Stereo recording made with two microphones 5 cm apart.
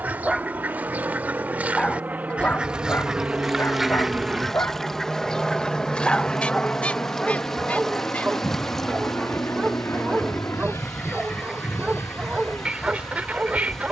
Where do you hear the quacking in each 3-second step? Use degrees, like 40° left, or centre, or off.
30° right, centre, 30° left, 10° left, 30° right.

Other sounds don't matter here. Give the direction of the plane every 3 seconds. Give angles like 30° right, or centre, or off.
40° right, 10° right, 30° left, 50° left, 60° left.